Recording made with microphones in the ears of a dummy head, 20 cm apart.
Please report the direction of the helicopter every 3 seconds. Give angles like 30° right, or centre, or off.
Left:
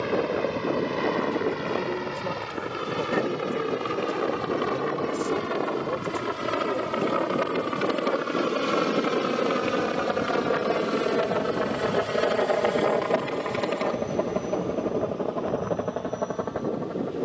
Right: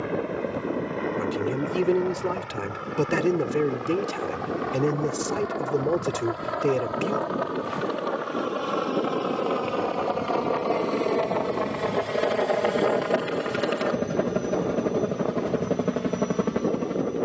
50° left, 50° left, 40° left, 20° left, 10° right, 30° right.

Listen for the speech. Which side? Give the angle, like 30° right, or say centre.
60° right.